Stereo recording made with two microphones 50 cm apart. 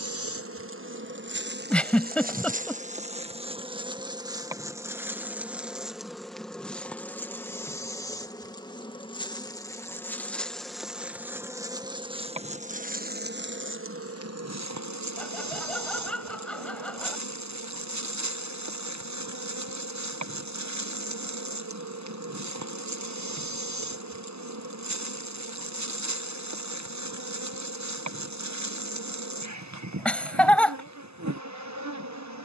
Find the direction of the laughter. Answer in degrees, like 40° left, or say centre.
centre.